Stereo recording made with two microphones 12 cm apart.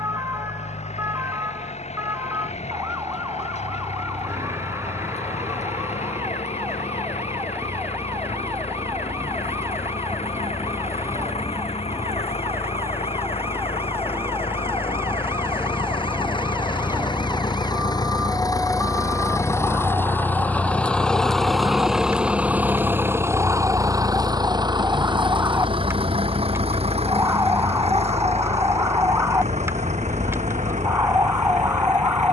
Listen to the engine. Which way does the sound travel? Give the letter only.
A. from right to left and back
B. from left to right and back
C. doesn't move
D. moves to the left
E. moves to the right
E.